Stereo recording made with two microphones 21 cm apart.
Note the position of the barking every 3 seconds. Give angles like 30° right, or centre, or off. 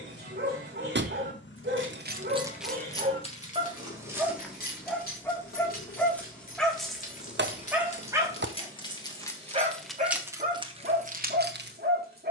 50° right, centre, 10° right, 40° right.